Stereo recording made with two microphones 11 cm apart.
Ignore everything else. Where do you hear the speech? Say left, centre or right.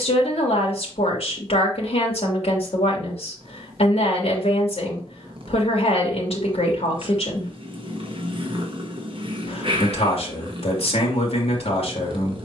left.